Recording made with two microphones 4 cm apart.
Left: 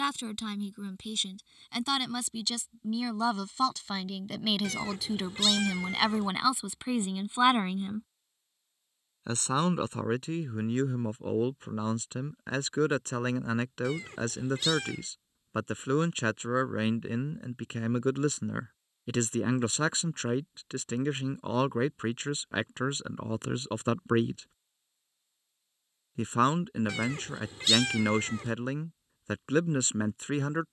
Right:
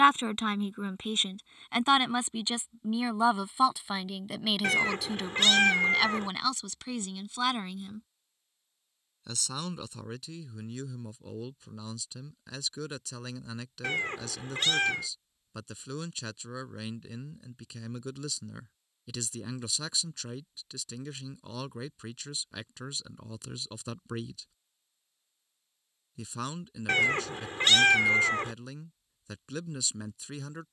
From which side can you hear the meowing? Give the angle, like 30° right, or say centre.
50° right.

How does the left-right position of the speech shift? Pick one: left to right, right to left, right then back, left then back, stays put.
right to left.